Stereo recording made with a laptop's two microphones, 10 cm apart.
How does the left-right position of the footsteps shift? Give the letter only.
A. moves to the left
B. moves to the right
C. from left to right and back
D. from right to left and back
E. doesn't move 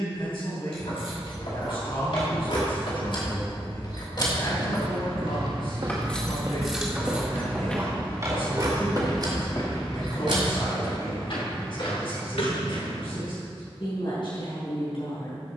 A.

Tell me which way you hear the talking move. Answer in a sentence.
In this clip you hear the talking stay put.